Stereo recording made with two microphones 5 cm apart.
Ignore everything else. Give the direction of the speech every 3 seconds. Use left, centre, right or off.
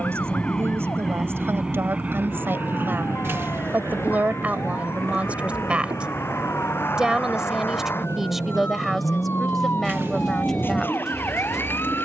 right, right, centre, centre.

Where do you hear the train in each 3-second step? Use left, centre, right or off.
centre, right, right, right.